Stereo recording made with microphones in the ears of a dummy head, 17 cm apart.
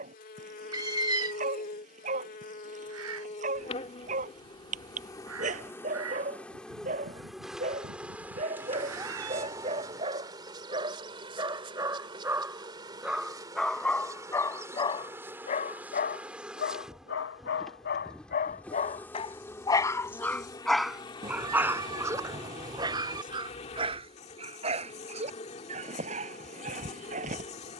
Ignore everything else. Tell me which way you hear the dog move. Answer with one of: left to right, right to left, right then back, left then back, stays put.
left then back.